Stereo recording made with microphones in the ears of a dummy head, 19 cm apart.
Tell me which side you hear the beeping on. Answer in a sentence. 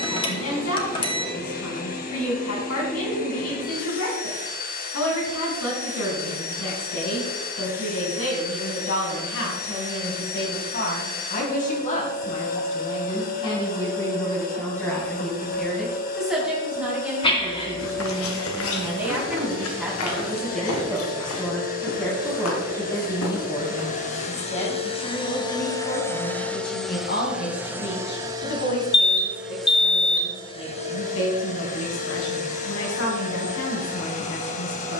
You can hear the beeping on the left.